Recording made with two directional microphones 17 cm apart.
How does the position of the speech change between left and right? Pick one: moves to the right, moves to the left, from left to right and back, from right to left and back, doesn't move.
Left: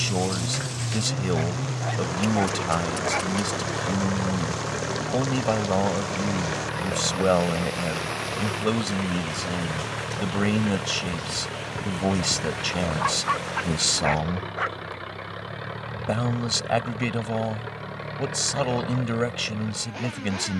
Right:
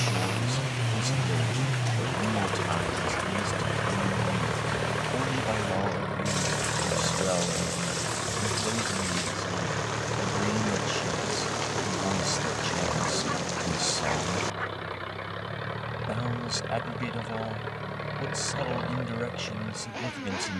doesn't move.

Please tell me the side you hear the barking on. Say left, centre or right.
left.